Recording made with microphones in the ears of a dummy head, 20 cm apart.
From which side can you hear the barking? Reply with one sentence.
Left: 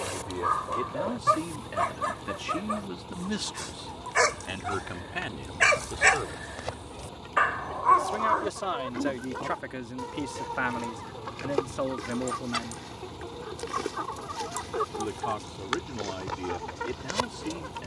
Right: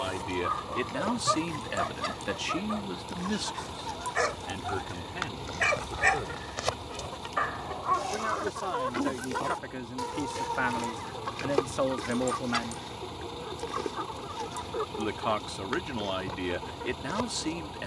You can hear the barking on the left.